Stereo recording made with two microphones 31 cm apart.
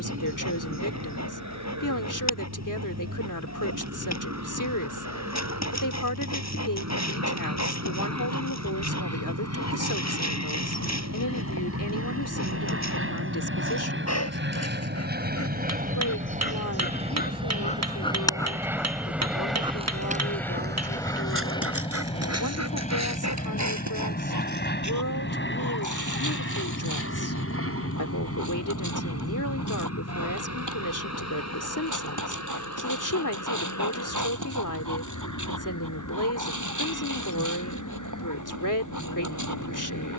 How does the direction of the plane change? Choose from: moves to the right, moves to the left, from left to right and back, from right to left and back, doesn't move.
moves to the left.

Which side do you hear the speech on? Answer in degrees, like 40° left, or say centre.
80° left.